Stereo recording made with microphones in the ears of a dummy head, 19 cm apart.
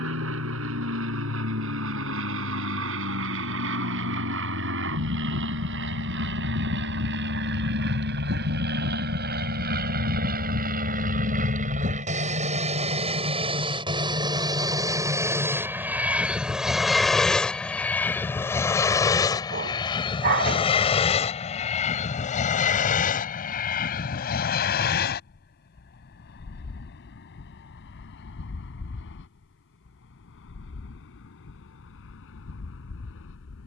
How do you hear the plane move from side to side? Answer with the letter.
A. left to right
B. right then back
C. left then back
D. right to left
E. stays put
D.